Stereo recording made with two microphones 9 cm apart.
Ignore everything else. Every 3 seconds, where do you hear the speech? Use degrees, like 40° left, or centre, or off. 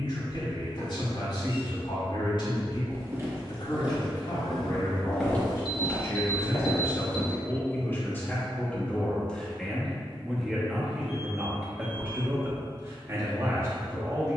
60° left, 50° left, 30° left, centre, 30° right.